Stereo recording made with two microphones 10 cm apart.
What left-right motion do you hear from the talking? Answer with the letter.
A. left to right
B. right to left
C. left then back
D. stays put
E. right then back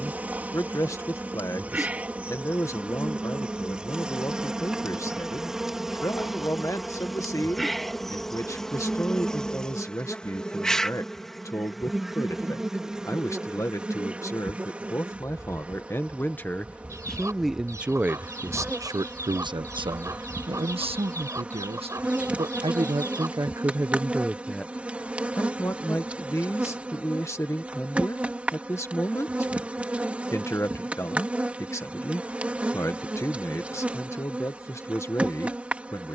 E.